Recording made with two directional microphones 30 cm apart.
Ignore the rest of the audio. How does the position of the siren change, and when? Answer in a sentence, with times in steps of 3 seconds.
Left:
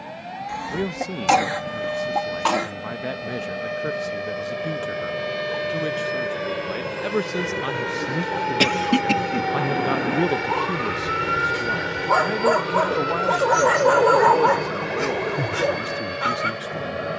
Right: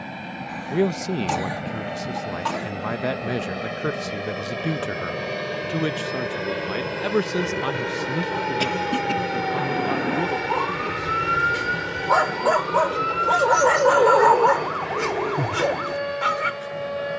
In this clip you hear the siren on the left from 0 s, in the centre from 9 s and on the right from 12 s.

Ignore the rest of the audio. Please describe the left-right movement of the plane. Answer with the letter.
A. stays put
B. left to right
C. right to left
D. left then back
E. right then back
C.